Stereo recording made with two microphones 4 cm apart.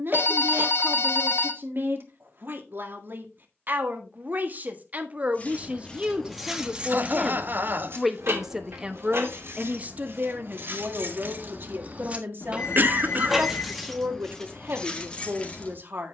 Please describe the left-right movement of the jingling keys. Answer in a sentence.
You can hear the jingling keys move from left to right and back again.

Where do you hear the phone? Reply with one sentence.
You can hear the phone on the left.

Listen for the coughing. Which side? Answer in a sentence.
In this clip you hear the coughing on the right.